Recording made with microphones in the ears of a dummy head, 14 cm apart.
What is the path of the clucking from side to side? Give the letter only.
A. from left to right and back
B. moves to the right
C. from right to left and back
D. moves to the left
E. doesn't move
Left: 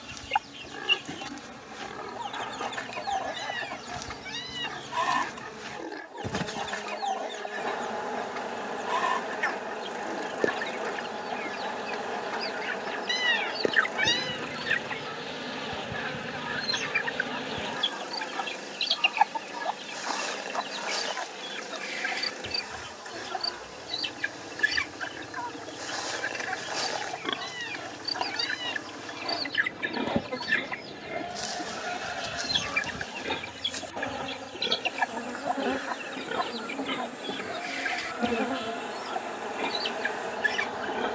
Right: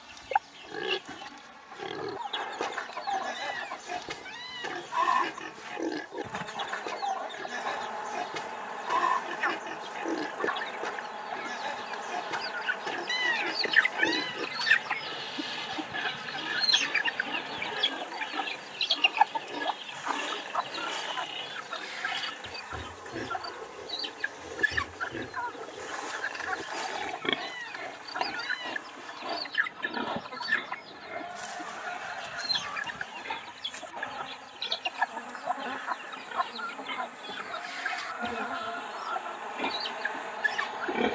A.